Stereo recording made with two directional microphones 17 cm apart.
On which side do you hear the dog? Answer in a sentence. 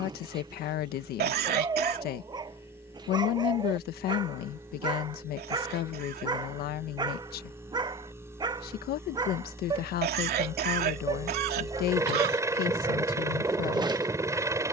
In this clip you hear the dog on the right.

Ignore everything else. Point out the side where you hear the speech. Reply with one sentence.
In this clip you hear the speech on the left.